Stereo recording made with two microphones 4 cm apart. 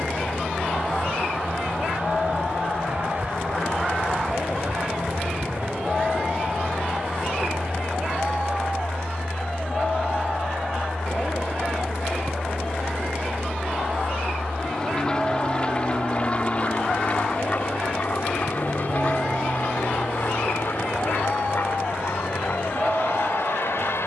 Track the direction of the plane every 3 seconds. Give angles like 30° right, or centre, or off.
50° right, 40° right, 30° right, 10° right, 20° left, 30° left, 50° left, 60° left.